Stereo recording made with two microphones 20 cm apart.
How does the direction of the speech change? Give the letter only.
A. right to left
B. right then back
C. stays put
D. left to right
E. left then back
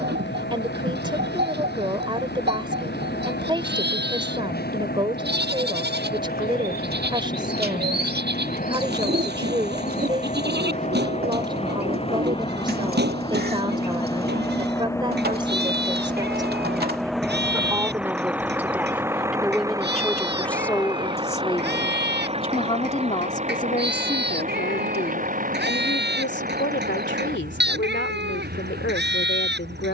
A.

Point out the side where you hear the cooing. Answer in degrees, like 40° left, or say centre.
50° right.